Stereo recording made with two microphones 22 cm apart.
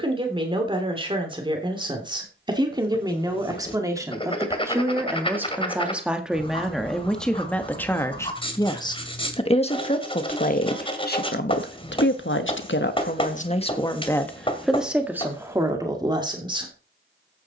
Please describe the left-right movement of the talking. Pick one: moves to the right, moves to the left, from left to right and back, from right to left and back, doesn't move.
from right to left and back.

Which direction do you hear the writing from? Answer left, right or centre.
left.